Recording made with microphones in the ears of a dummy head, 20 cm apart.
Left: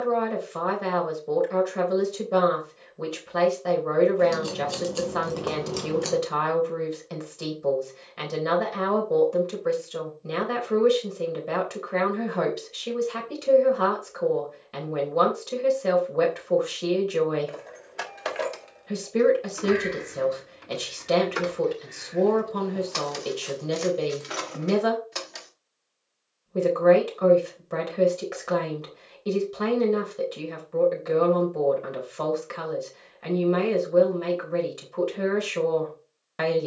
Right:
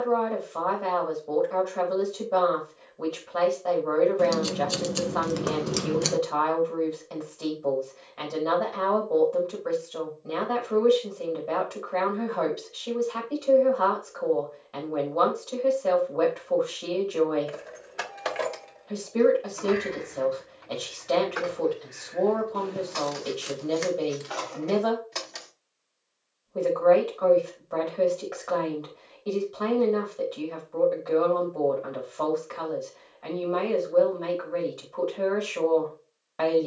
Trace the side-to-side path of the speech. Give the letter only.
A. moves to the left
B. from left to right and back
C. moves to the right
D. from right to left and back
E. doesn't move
E.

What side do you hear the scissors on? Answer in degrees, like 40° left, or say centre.
30° right.